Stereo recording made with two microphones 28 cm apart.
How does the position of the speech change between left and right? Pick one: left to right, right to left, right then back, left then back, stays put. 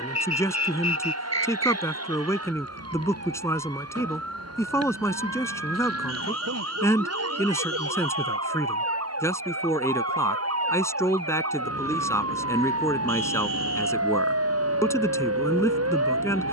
stays put.